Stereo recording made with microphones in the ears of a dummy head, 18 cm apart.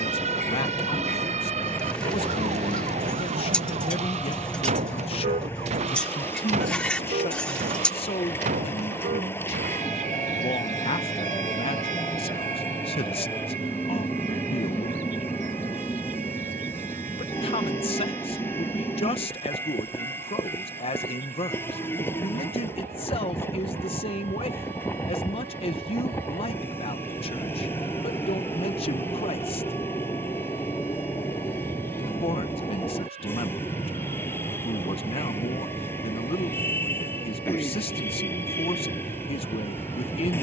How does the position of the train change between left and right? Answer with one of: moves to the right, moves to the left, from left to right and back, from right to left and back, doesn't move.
doesn't move.